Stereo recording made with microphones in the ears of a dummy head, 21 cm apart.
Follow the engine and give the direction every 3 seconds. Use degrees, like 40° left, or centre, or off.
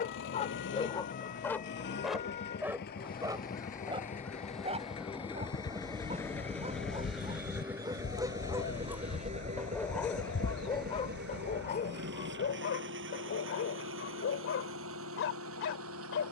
50° left, 30° left, 10° right, 40° right, 60° right, 60° right.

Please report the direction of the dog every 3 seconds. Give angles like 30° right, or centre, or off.
10° left, 20° right, 20° right, 20° left, 50° left, 60° left.